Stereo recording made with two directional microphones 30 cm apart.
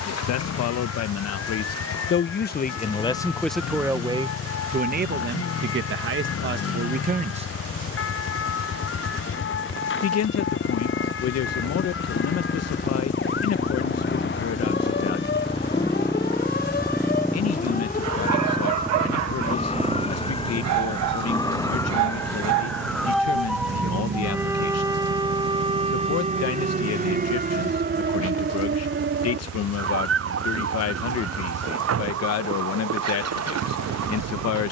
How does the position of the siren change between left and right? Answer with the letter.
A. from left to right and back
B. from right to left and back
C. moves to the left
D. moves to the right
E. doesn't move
D.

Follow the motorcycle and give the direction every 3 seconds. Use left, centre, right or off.
left, left, left, left, left, centre, centre, right, right, right, right, right.